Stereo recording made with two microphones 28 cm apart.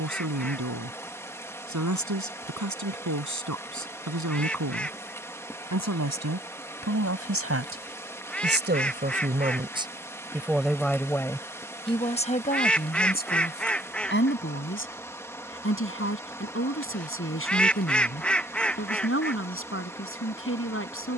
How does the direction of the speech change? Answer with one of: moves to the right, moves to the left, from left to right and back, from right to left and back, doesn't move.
moves to the left.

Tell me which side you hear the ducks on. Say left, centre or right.
centre.